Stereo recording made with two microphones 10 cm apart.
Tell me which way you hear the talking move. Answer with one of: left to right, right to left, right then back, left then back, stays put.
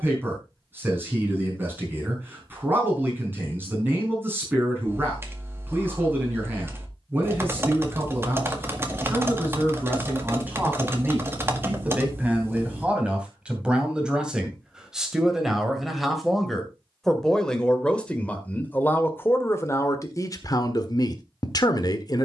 right to left.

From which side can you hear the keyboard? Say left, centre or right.
right.